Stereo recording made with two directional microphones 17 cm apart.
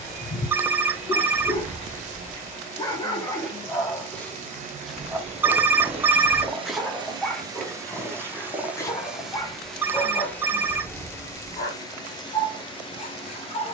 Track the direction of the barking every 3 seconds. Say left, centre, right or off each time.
left, centre, centre, left, left.